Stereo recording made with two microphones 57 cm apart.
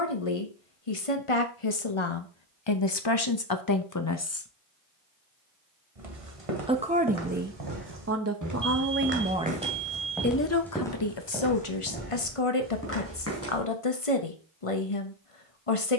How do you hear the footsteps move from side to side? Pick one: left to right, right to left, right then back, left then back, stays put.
right to left.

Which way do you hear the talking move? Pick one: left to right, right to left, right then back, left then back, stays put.
right then back.